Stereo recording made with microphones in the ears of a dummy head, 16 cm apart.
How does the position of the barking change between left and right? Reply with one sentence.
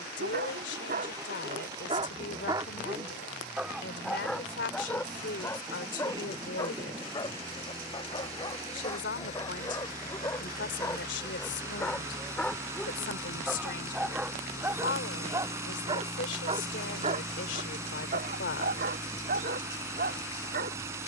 In this clip you hear the barking go left and come back.